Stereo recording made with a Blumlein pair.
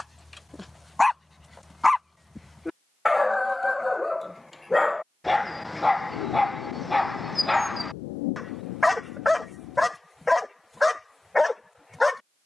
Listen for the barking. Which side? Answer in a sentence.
In this clip you hear the barking in the centre.